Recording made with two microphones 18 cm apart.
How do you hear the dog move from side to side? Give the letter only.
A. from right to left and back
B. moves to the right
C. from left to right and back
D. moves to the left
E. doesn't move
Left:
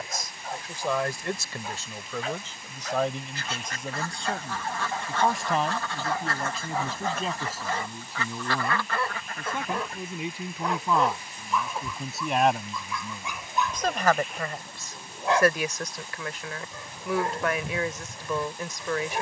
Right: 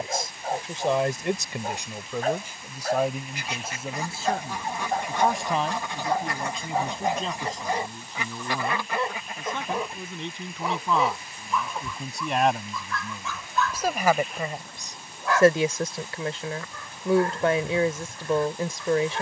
D.